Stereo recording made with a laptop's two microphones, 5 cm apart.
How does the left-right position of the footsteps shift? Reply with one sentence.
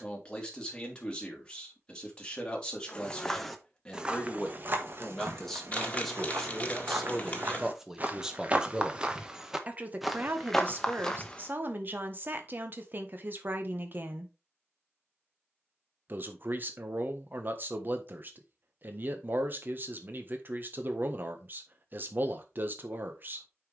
In this clip you hear the footsteps move from left to right and back again.